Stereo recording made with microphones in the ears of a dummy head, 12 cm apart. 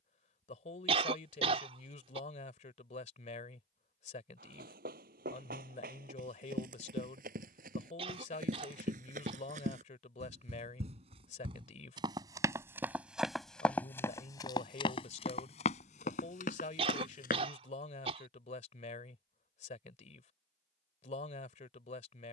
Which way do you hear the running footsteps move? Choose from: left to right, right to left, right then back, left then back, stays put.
right to left.